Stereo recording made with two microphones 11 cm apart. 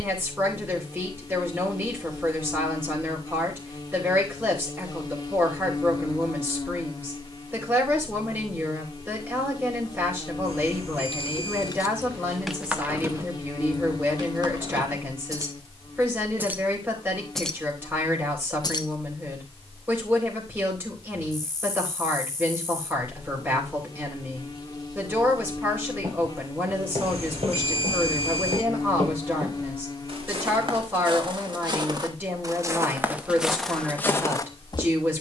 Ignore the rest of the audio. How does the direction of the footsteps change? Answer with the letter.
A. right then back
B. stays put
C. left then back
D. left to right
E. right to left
E.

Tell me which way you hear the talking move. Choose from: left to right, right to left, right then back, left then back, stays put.
stays put.